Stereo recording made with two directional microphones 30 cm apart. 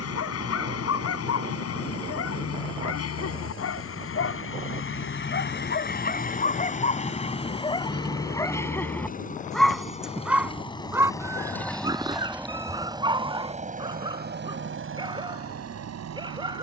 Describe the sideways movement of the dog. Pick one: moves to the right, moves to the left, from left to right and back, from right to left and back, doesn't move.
moves to the right.